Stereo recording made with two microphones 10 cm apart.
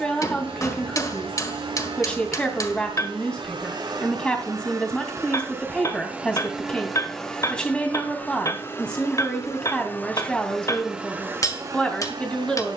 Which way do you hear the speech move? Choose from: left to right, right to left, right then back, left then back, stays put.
stays put.